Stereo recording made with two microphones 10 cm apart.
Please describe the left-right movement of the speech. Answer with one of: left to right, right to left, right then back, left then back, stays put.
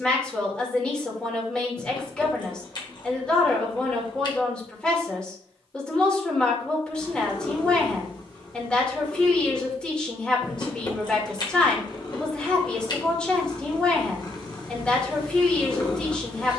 stays put.